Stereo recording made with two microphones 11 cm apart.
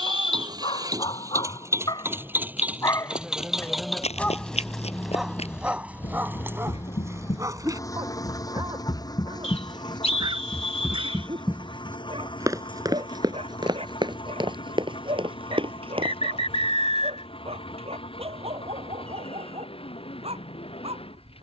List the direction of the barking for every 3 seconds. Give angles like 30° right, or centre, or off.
50° left, centre, 30° right, 50° right, 60° right, 60° right, 70° right.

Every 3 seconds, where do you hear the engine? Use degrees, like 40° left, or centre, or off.
30° right, 10° left, 30° left, 40° left, 50° left, 50° left, 60° left.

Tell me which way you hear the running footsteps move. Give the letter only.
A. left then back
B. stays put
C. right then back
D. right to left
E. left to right
E.